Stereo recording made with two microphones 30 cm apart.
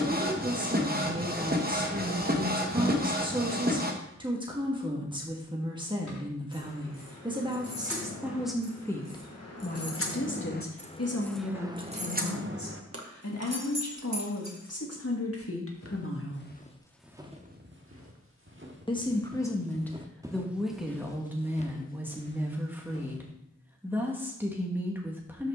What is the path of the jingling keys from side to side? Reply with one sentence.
In this clip you hear the jingling keys go from the left side to the right.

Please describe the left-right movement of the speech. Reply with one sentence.
In this clip you hear the speech move from right to left and back again.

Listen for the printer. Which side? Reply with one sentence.
In this clip you hear the printer on the right.